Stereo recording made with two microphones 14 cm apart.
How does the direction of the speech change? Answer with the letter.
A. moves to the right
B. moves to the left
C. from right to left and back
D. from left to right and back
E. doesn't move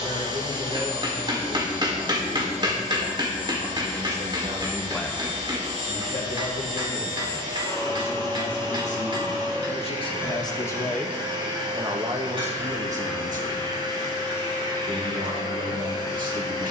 C.